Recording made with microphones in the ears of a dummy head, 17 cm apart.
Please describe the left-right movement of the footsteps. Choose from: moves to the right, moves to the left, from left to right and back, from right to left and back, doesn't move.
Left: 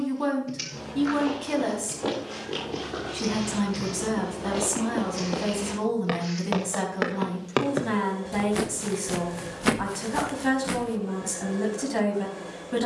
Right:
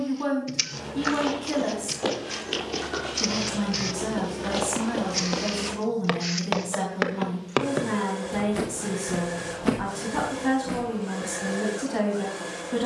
moves to the left.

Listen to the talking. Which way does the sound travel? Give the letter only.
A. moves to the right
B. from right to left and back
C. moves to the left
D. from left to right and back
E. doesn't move
E.